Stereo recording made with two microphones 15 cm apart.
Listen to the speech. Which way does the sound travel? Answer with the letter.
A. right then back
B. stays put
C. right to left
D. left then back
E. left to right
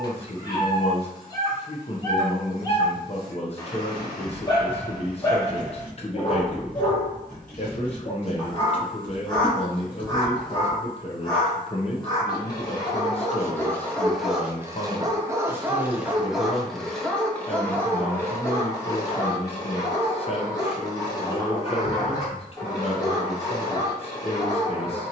B.